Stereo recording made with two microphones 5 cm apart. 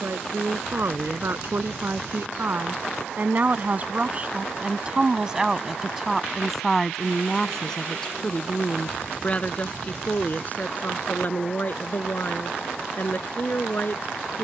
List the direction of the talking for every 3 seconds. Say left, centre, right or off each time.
right, right, centre, left, left.